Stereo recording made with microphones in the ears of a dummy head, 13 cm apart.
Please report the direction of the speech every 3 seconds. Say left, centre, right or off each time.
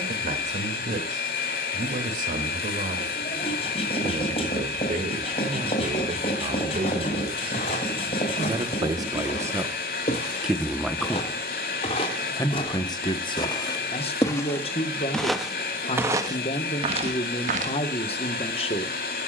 right, right, right, centre, left, left, left.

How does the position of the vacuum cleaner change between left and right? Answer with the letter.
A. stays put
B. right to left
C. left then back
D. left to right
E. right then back
A.